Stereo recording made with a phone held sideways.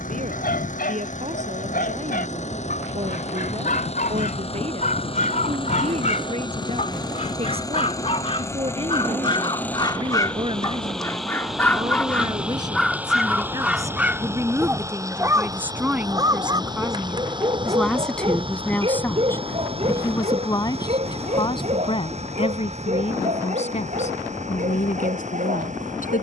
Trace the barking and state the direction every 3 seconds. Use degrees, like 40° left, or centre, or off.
70° left, 60° left, 40° left, 20° left, centre, 30° right, 40° right, 50° right, 60° right.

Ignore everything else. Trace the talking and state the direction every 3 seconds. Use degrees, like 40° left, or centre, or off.
50° right, 40° right, 40° right, 30° right, 20° right, 10° right, 20° left, 40° left, 60° left.